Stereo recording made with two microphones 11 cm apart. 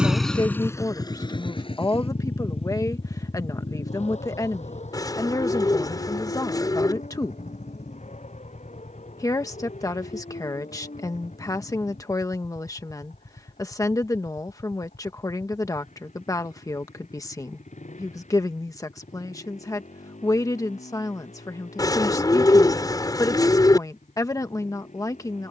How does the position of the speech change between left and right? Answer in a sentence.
In this clip you hear the speech stay in one place.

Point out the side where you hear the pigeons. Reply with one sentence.
In this clip you hear the pigeons on the left.